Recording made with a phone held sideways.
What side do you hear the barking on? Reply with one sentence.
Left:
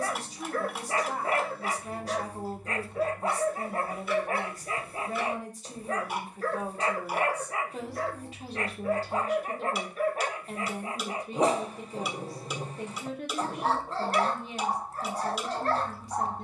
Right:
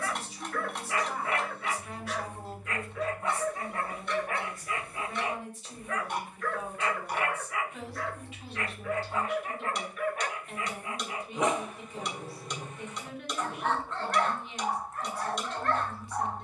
You can hear the barking on the left.